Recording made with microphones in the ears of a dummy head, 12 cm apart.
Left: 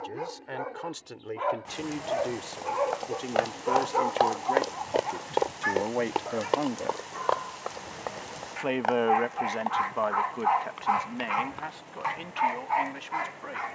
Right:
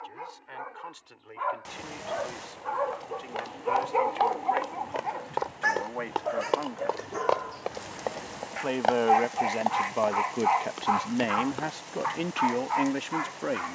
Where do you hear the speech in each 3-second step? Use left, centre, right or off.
left, left, left, right, right.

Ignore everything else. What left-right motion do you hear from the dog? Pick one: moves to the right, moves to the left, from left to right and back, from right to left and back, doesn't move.
from left to right and back.